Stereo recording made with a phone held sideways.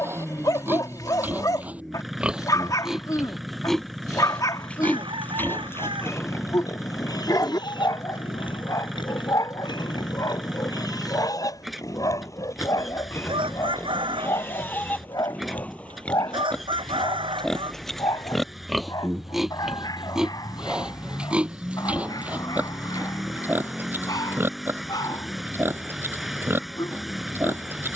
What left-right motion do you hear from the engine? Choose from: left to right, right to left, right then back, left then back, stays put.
stays put.